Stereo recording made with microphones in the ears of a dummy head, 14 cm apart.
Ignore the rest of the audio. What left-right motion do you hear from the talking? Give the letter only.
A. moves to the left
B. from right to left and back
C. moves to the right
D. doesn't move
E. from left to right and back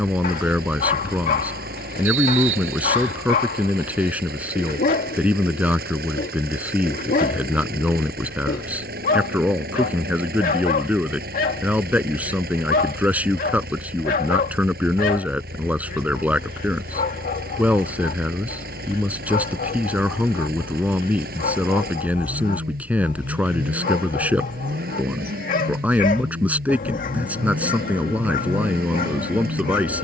D.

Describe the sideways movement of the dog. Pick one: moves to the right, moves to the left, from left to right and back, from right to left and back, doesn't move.
doesn't move.